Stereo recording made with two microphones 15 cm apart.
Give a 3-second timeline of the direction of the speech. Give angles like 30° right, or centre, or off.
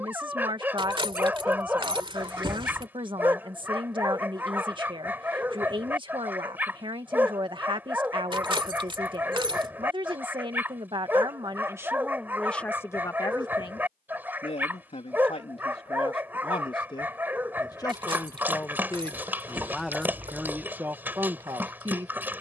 30° right, 30° right, 30° right, 30° right, 20° left, 40° left, centre, 30° right.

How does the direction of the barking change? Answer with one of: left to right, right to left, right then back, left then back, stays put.
stays put.